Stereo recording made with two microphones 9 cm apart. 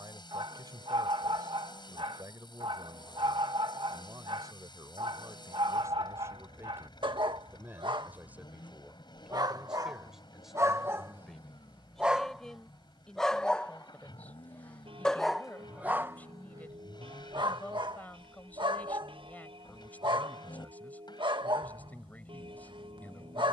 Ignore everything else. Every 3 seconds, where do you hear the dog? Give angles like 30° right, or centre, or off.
60° right, 60° right, 60° right, 30° right, 10° left, 30° right, 60° right, 60° right.